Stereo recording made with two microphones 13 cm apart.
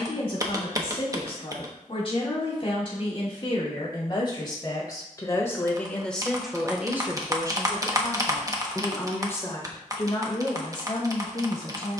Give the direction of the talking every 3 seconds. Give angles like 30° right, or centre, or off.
40° left, 30° left, 10° right, 30° left.